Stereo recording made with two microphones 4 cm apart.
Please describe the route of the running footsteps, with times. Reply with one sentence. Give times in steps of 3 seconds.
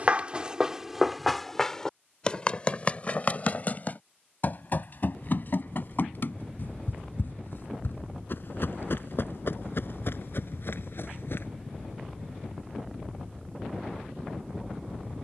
You can hear the running footsteps in the centre from 0 s, on the left from 3 s and not at all from 12 s.